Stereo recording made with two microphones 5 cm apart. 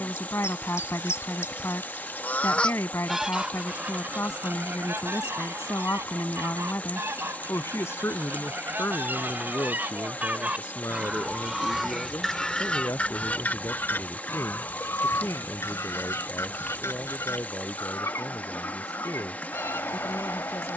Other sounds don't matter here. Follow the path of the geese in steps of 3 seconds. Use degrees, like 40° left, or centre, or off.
50° left, 40° right, 50° right, 30° right, 30° left, 70° left, 70° left.